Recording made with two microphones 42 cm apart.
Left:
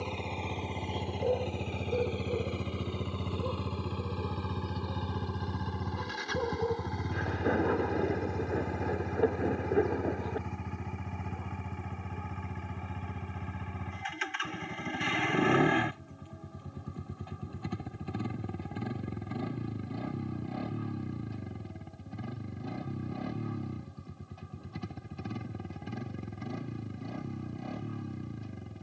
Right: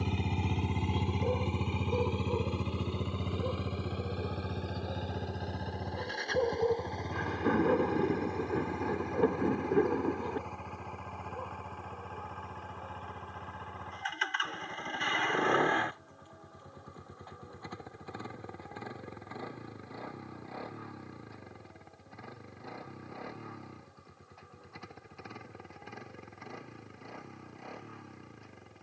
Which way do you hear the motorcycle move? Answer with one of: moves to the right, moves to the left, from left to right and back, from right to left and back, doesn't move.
moves to the left.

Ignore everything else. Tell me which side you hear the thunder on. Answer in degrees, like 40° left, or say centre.
10° right.